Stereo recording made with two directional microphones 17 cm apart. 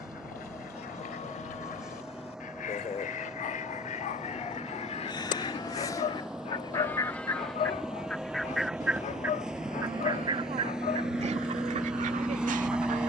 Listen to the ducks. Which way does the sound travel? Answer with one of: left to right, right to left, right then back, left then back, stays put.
left to right.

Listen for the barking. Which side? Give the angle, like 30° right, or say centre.
50° left.